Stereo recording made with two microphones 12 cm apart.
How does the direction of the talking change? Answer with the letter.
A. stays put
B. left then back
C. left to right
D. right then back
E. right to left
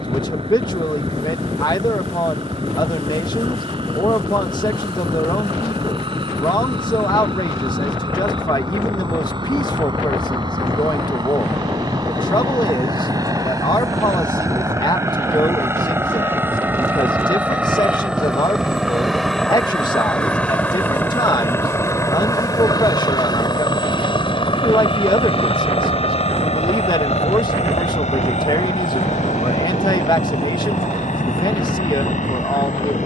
A.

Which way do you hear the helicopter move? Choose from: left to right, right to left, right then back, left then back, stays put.
right to left.